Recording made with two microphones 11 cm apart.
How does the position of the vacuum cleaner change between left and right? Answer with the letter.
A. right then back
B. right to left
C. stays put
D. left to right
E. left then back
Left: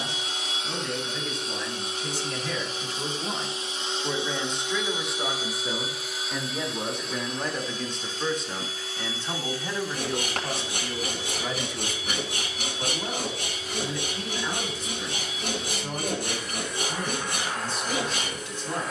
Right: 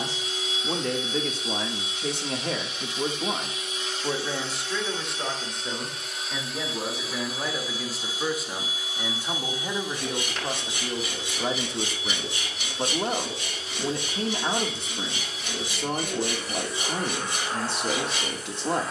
D.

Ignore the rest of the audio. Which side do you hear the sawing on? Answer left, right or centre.
left.